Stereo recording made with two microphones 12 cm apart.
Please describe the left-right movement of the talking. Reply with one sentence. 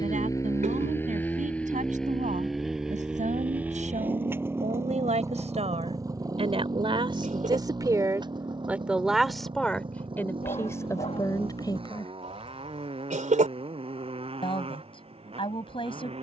In this clip you hear the talking go from the right side to the left.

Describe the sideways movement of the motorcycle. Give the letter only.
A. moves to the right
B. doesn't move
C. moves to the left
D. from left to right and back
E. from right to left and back
A.